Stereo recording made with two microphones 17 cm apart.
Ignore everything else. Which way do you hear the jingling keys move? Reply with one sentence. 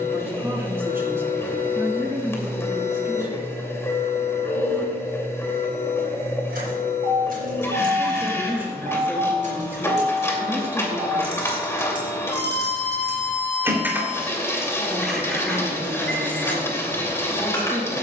In this clip you hear the jingling keys move to the left.